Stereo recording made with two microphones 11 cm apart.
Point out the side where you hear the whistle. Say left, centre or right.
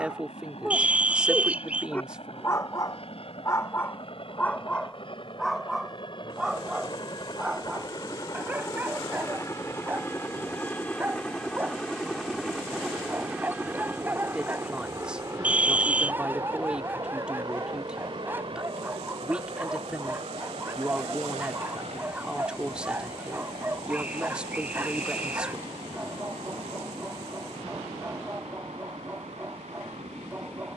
centre.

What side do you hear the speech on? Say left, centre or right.
centre.